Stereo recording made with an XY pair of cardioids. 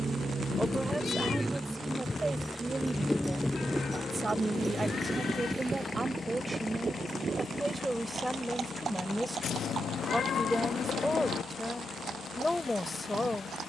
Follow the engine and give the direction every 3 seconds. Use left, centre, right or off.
centre, left, left, left, left.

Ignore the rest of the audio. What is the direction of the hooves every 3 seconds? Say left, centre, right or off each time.
left, centre, right, right, right.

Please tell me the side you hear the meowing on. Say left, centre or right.
left.